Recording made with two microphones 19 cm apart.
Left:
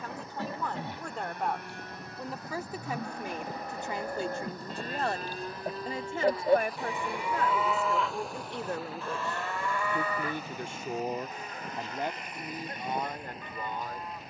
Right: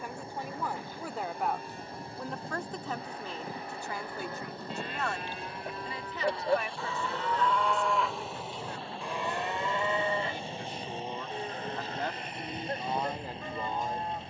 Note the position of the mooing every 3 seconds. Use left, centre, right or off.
left, left, centre, right, right.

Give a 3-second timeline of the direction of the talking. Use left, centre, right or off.
centre, left, left, left, centre.